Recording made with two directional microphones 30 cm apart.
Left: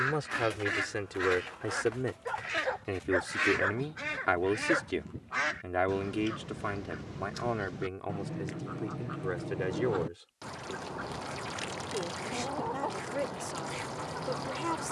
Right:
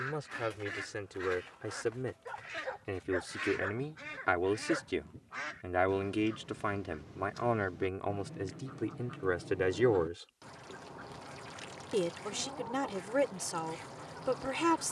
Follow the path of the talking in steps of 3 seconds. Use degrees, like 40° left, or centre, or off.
40° left, 10° left, 10° right, 30° right, 40° right.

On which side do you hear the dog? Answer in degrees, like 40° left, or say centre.
40° left.